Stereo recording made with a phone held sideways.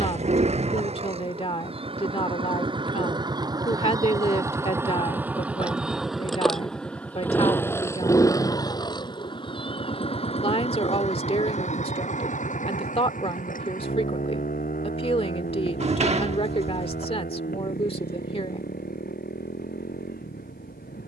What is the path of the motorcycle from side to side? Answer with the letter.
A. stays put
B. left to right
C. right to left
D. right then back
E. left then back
C.